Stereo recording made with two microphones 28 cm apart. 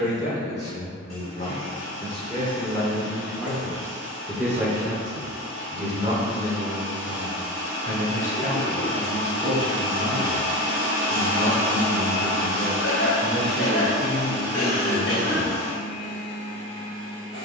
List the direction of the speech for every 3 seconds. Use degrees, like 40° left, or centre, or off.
30° left, 10° right, 40° right, 50° right, 60° right, 60° right.